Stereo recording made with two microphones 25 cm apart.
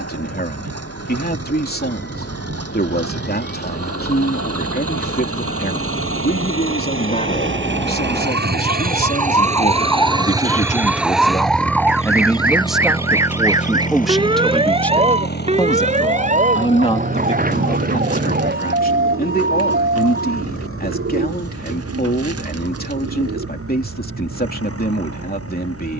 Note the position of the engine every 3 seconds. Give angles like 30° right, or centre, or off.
80° right, 70° right, 50° right, 10° right, 30° left, 50° left, 60° left, 60° left, 70° left.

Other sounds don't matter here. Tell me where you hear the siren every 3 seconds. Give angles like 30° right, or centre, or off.
50° left, 40° left, 20° left, 10° left, 10° right, 30° right, 40° right, 50° right, 60° right.